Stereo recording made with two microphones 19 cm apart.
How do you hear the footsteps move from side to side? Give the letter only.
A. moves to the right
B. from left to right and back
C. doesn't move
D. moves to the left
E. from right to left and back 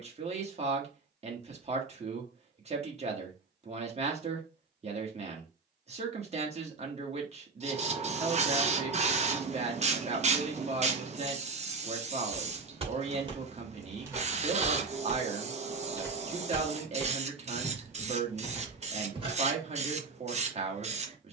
E.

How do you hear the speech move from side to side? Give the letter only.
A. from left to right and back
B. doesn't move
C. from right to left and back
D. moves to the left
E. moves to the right
B.